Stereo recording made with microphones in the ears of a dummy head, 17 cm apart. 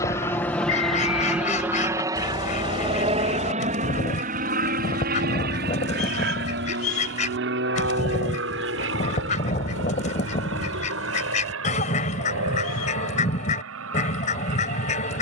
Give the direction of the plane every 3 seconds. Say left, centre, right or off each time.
centre, right, right, right, right.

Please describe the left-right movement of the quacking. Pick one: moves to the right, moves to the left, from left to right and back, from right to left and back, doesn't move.
doesn't move.